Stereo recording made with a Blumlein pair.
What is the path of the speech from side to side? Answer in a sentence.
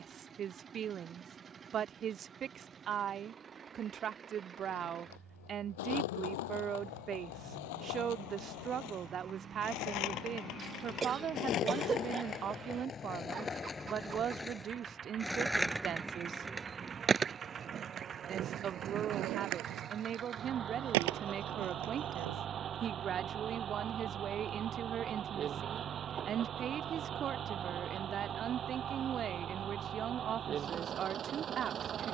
In this clip you hear the speech stay put.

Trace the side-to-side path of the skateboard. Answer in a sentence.
In this clip you hear the skateboard travel towards the right.